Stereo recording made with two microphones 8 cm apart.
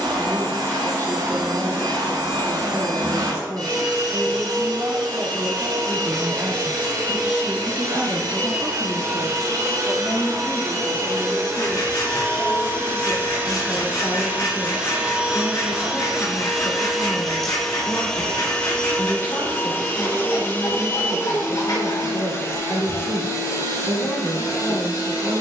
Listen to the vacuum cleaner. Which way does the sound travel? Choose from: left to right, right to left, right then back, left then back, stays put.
right to left.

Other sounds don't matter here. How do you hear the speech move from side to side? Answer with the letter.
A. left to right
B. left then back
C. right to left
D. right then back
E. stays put
C.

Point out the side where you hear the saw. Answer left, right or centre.
left.